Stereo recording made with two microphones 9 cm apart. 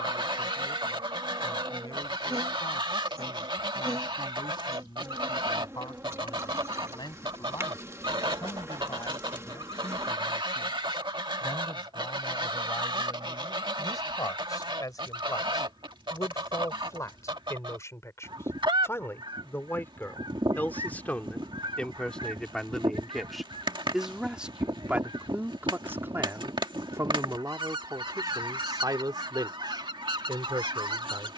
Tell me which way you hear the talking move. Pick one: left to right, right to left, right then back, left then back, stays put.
left to right.